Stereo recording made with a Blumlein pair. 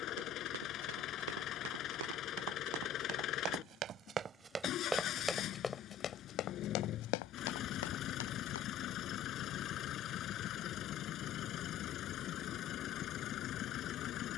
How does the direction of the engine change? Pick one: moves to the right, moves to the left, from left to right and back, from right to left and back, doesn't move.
doesn't move.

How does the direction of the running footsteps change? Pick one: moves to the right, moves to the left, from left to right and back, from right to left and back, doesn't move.
moves to the left.